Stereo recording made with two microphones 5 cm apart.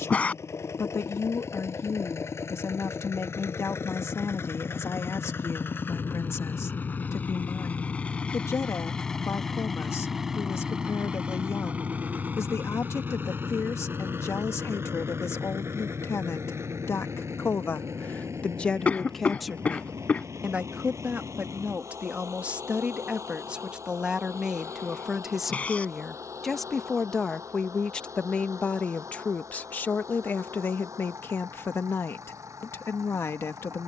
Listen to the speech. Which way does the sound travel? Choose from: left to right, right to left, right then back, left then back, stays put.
right then back.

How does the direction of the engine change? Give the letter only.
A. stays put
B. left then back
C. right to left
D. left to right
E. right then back
D.